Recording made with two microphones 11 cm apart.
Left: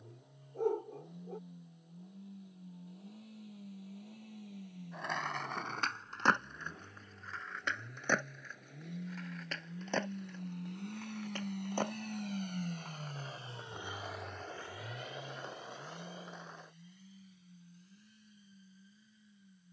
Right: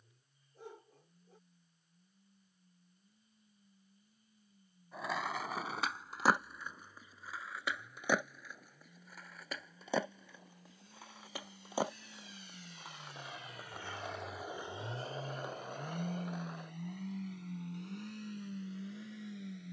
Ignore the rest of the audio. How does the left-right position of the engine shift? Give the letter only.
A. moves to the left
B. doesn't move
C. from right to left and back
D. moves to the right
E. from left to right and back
D.